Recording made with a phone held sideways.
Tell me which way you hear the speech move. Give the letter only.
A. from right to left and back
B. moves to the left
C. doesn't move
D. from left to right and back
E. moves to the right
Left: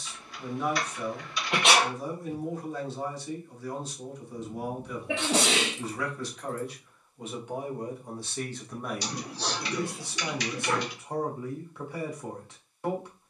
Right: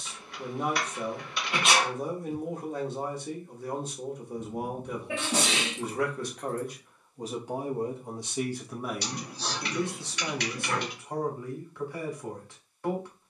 B.